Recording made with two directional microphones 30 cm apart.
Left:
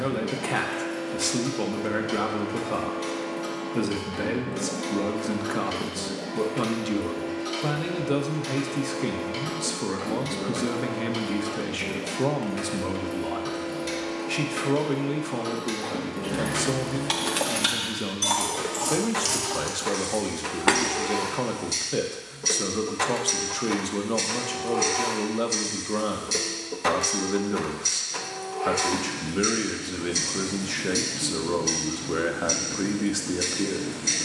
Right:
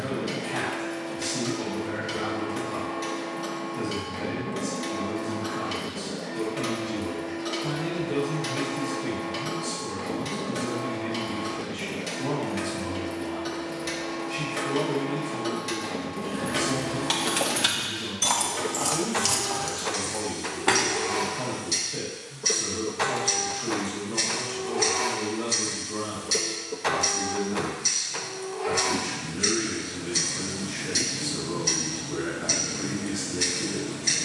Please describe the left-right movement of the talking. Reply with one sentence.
You can hear the talking stay put.